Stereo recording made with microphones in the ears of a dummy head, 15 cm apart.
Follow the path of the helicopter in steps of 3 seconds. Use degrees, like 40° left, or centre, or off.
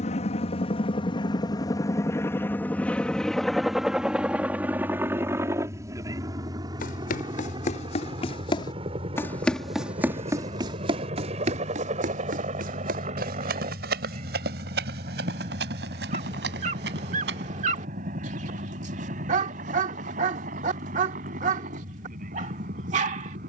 30° left, 10° right, 30° right, 40° right, 40° right, 50° right, 50° right, 50° right.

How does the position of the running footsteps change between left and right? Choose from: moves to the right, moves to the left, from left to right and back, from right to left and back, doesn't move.
moves to the right.